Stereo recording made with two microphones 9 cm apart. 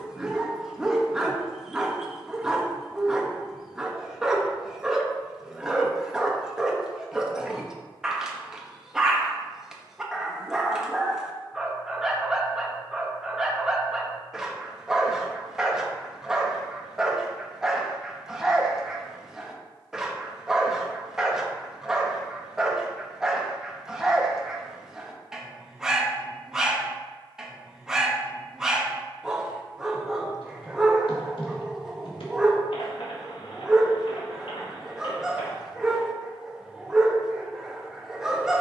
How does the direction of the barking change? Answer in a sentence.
You can hear the barking stay put.